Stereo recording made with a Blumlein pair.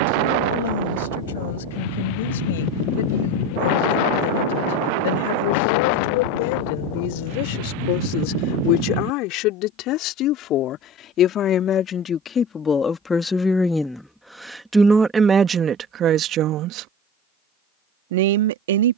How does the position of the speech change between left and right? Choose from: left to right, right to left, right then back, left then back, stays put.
left to right.